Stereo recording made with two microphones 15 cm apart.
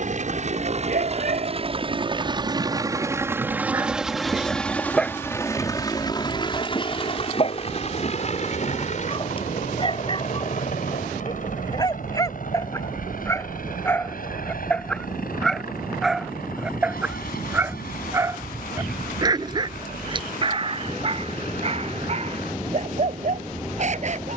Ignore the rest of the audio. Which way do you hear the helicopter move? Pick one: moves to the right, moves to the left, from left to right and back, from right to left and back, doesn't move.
moves to the left.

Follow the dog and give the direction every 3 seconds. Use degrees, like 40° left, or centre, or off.
60° right, centre, 40° left, 30° left, 20° left, 10° right, 30° right, 50° right.